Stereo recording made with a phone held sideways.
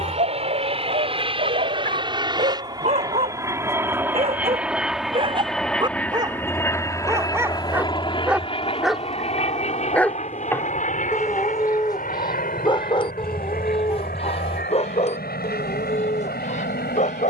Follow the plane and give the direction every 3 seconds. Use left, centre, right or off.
right, centre, left, left, left, left.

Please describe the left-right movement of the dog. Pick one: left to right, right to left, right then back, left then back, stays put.
right to left.